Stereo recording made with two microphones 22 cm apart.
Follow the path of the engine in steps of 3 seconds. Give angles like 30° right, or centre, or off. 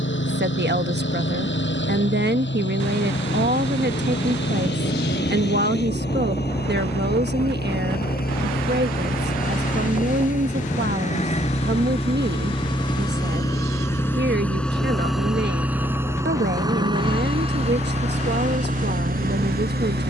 60° left, 50° left, 50° left, 40° left, 10° left, 20° right, 40° right.